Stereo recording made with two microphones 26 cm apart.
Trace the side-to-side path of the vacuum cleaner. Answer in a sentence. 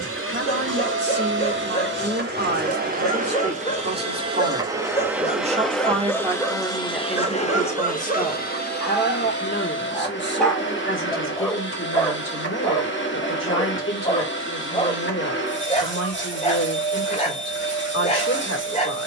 In this clip you hear the vacuum cleaner go from the right side to the left.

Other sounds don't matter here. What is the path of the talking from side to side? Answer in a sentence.
In this clip you hear the talking move from right to left.